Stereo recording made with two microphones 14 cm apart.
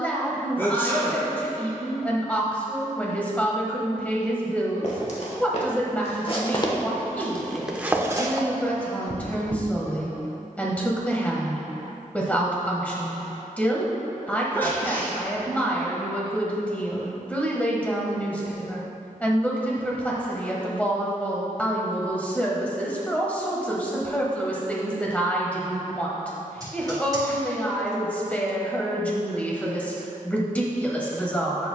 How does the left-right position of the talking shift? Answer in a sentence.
In this clip you hear the talking stay in one place.